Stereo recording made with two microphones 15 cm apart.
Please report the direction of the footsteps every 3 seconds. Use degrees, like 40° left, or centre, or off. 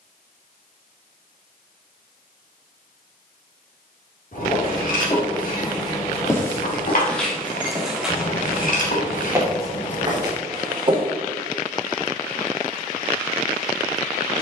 off, 30° left, centre, 30° right, off.